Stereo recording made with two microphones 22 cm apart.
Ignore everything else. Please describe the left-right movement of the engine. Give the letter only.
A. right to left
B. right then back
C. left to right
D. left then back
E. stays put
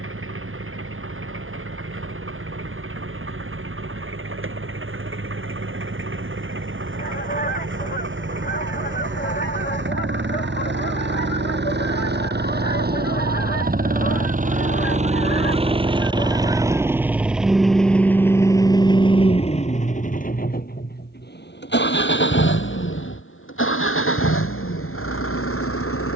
A.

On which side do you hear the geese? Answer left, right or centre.
left.